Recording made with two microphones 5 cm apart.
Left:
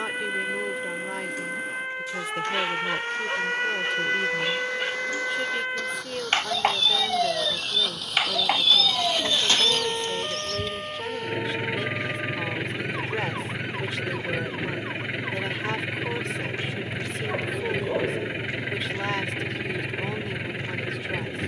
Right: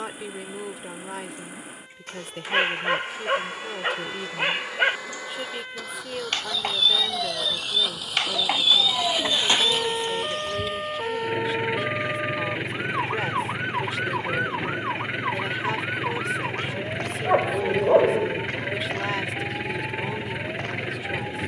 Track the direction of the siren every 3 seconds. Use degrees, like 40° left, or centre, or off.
70° left, 50° left, 20° left, 10° right, 40° right, 50° right, 50° right.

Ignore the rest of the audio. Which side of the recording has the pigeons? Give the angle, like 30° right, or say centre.
20° right.